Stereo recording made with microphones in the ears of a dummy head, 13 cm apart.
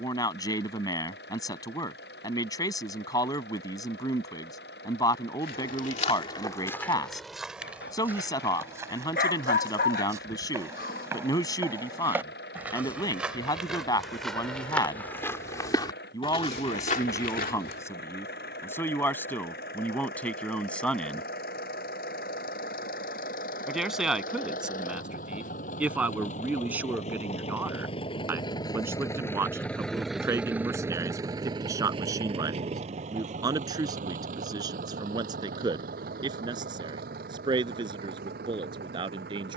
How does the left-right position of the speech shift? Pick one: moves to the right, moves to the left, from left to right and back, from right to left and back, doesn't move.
moves to the right.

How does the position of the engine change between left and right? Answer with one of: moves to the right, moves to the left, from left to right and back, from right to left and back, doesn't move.
moves to the right.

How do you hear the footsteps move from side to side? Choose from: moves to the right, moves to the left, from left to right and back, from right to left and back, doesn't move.
from left to right and back.